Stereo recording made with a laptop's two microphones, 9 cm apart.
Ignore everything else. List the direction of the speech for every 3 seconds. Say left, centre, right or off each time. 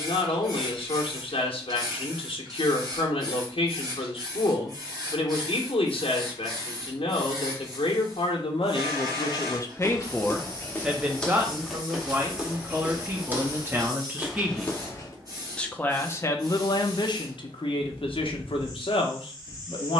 left, left, left, centre, right, left, left.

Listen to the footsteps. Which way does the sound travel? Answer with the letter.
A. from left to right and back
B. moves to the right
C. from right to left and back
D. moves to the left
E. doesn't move
A.